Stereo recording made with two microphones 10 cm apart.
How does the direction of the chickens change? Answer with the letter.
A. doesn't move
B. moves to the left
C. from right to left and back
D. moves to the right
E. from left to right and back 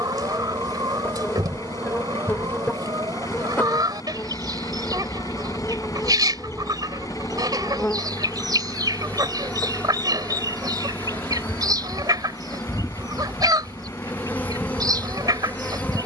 A.